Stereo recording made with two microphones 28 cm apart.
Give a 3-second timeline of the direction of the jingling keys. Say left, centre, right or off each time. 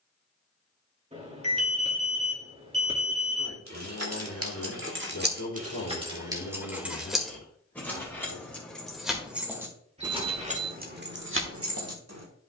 off, right, centre, right.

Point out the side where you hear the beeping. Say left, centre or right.
right.